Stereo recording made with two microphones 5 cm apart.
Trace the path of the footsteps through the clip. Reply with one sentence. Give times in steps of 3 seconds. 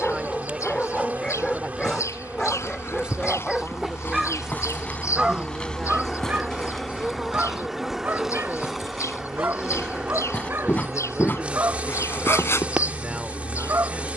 In this clip you hear the footsteps on the left from 0 s, in the centre from 6 s and on the left from 9 s.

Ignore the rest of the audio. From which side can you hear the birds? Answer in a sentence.
In this clip you hear the birds on the left.